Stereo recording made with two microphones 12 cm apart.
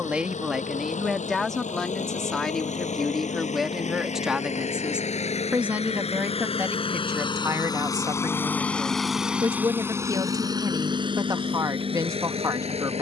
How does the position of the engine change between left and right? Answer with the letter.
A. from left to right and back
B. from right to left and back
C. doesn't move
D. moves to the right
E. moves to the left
D.